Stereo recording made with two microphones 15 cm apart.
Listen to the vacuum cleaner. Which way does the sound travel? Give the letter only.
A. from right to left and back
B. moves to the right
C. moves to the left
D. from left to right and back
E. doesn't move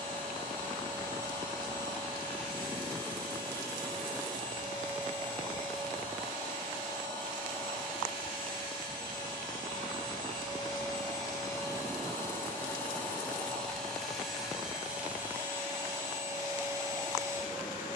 B.